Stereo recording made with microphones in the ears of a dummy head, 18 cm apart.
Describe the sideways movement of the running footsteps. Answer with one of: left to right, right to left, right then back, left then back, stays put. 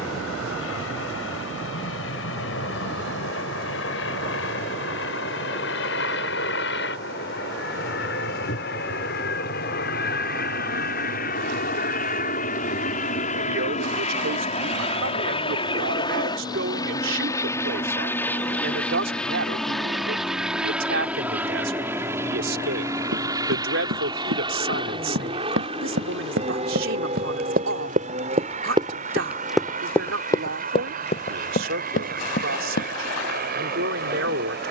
right to left.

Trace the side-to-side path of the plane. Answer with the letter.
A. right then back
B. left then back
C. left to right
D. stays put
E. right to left
C.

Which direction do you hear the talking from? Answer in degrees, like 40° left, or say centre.
70° right.